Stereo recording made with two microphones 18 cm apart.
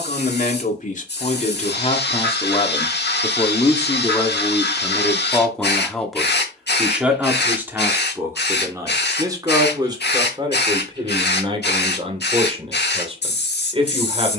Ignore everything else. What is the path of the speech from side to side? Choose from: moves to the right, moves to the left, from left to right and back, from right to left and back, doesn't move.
moves to the right.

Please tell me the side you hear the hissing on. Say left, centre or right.
left.